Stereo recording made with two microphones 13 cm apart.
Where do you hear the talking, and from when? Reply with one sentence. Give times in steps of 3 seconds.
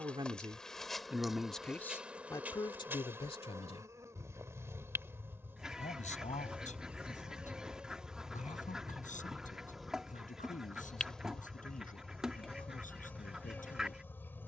You can hear the talking in the centre from 0 s and on the left from 3 s.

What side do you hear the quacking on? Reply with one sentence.
You can hear the quacking in the centre.